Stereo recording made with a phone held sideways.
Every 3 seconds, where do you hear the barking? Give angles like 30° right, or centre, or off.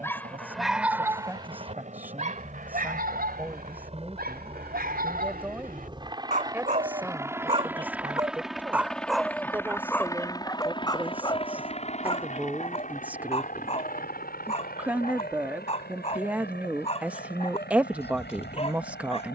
30° right, 70° right, 30° right, 20° left, 40° left, 40° left, 40° left.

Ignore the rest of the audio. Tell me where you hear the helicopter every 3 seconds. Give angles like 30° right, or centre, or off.
50° right, 40° right, 10° right, 20° left, 50° left, 70° left, 80° left.